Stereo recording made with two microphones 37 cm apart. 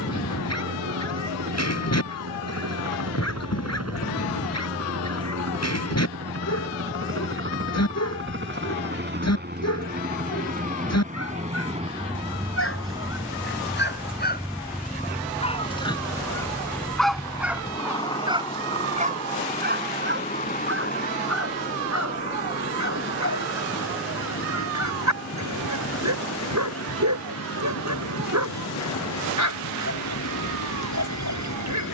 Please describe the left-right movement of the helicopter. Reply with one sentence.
In this clip you hear the helicopter go from the right side to the left.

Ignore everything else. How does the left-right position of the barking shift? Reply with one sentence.
In this clip you hear the barking travel towards the right.